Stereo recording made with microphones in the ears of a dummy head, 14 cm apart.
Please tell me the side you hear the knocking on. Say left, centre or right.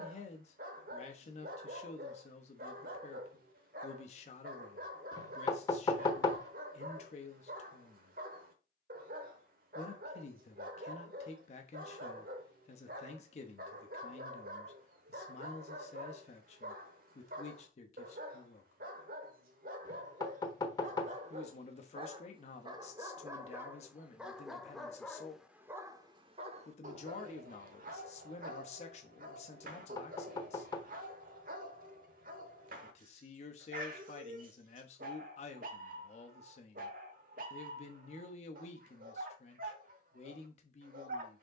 left.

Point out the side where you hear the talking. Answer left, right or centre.
left.